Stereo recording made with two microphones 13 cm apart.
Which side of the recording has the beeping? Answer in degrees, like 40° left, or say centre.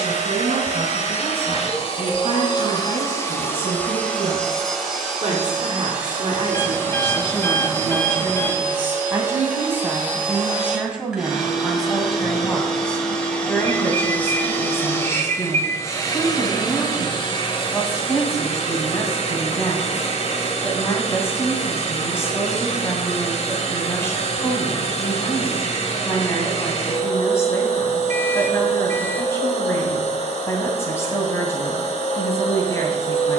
20° left.